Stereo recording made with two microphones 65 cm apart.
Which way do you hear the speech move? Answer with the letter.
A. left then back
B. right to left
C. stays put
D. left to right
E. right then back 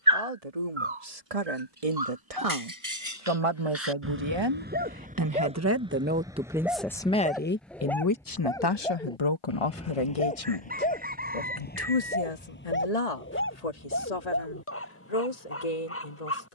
B.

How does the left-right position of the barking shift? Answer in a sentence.
In this clip you hear the barking move to the left.